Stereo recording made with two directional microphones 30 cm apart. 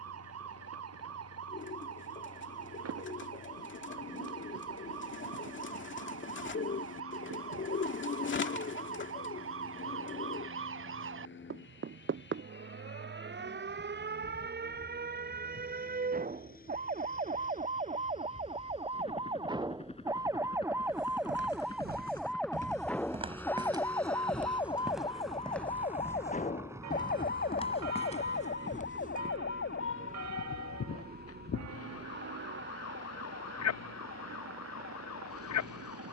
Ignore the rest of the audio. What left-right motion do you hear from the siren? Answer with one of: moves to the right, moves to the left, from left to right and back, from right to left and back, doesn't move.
moves to the left.